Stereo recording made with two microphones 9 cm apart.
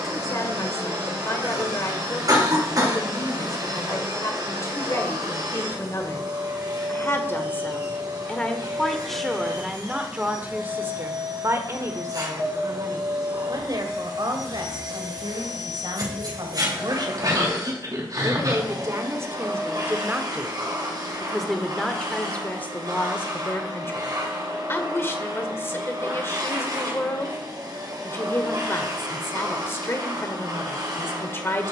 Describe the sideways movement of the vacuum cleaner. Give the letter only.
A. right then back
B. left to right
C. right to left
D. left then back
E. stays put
E.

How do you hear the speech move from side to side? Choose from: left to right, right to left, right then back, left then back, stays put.
right then back.